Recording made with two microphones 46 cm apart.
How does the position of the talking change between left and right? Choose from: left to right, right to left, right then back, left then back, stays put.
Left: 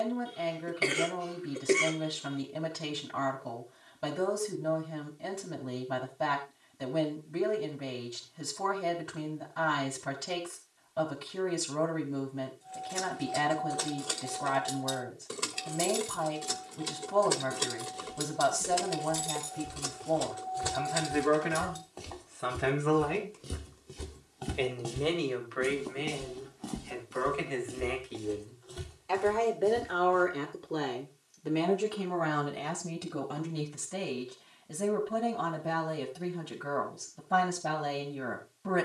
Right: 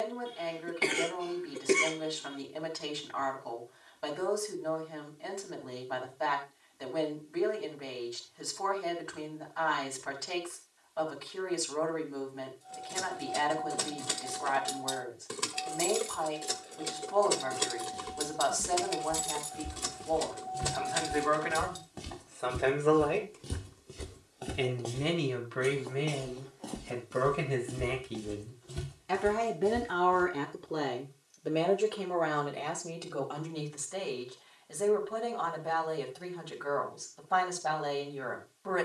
right then back.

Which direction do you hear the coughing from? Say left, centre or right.
centre.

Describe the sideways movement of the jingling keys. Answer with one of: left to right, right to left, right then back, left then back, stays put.
left then back.